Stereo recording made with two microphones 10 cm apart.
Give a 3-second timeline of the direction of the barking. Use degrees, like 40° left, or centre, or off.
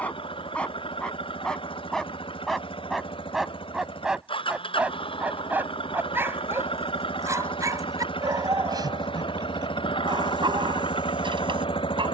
10° left, 10° right, 30° right, 50° right.